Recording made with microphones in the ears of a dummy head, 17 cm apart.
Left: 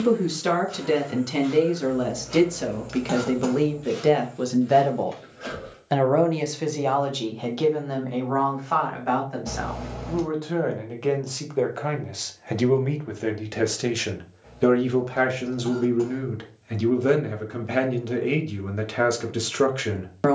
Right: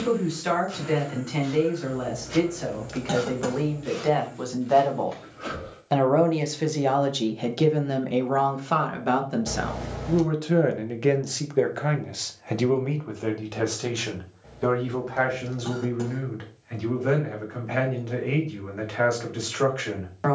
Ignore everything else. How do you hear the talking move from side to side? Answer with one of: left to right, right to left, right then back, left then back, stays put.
right then back.